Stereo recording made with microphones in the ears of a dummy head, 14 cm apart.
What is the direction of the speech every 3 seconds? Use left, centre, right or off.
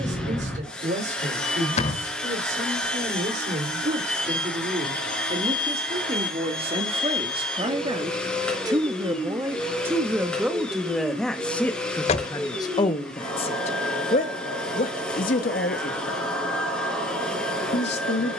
right, right, right, centre, left, left.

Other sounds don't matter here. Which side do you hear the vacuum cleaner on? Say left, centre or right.
centre.